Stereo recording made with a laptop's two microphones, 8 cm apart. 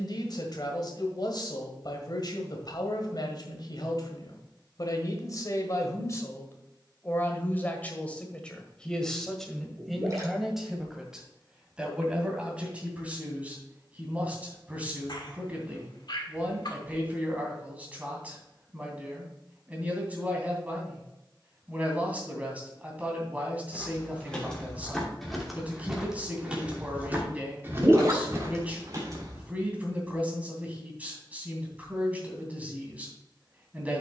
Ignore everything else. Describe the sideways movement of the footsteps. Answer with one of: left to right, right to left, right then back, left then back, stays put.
left to right.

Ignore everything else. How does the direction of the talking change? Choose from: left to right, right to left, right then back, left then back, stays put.
left to right.